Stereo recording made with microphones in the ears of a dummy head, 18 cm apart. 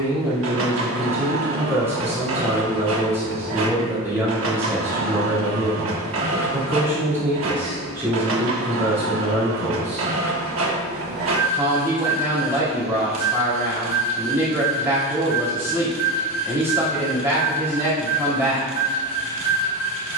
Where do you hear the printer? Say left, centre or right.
right.